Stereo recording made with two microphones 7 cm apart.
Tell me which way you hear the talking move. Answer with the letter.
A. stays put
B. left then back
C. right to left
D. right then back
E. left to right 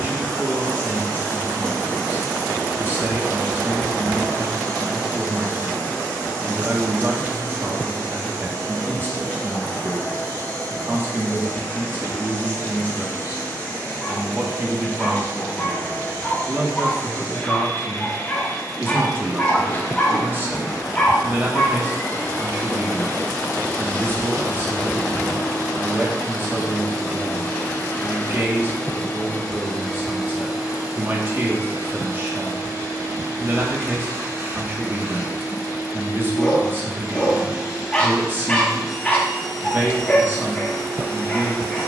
A.